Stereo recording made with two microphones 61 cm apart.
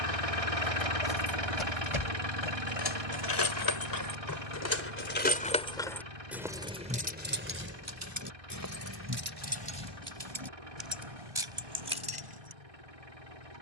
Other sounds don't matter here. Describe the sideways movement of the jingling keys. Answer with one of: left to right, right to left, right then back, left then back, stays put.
left to right.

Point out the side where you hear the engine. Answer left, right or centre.
right.